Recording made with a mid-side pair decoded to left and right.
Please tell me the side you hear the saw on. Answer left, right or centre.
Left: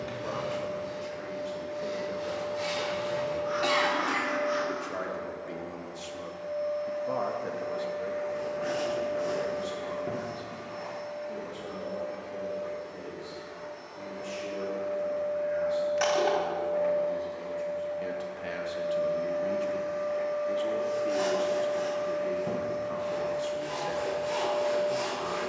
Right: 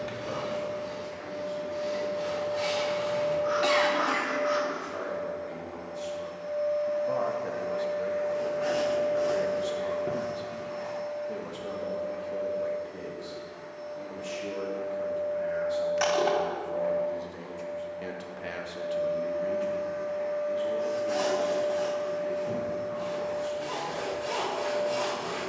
right.